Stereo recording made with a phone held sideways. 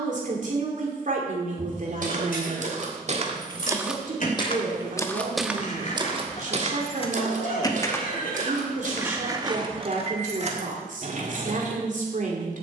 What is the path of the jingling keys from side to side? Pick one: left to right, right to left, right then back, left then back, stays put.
left to right.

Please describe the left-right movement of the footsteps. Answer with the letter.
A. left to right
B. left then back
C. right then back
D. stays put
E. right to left
B.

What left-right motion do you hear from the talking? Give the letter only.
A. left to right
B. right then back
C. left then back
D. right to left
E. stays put
E.